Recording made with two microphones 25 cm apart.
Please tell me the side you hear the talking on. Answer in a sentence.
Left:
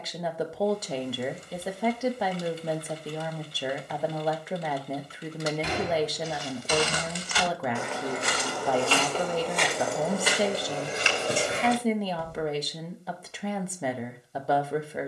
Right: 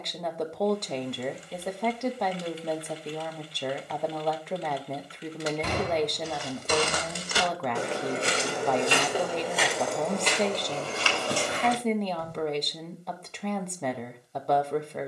In this clip you hear the talking in the centre.